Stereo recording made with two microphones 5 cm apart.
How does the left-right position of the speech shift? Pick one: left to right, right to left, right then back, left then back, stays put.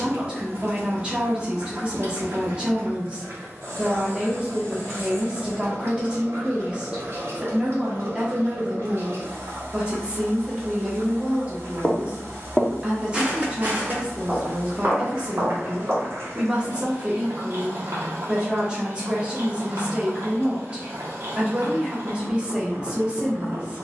stays put.